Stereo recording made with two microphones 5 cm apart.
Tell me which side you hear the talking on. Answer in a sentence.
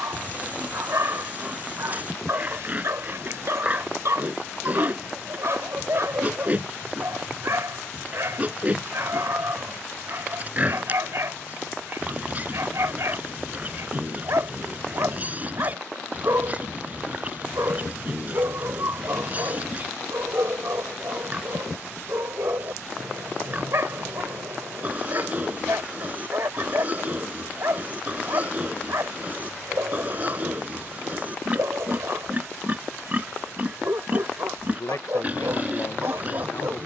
You can hear the talking on the left.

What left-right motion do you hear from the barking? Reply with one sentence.
In this clip you hear the barking stay put.